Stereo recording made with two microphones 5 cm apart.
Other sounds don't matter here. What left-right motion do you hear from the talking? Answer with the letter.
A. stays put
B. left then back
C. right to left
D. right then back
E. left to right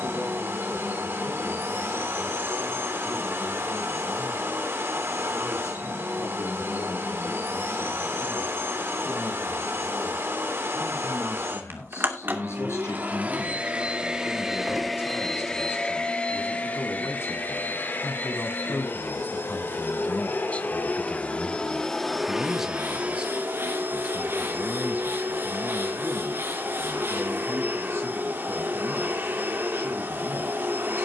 E.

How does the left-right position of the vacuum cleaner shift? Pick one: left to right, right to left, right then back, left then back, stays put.
left then back.